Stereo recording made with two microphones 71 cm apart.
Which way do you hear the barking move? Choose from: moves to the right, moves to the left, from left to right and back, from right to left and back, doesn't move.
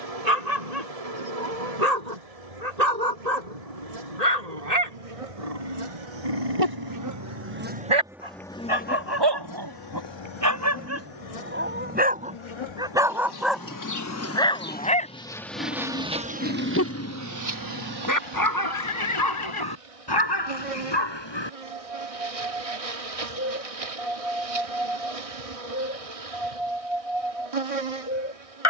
moves to the left.